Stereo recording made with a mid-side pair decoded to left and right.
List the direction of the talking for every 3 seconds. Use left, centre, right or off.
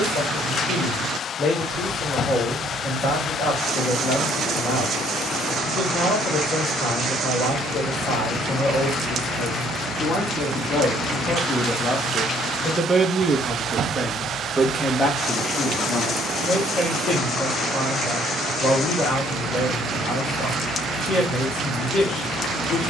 left, left, left, left, centre, left, left, left.